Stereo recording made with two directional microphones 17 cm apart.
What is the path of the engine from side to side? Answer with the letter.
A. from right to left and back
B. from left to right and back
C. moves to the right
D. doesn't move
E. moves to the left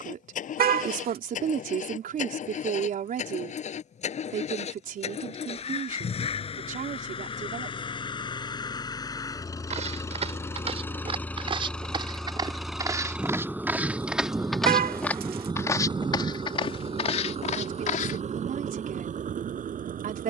C.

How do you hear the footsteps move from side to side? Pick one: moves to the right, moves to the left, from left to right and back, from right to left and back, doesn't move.
moves to the left.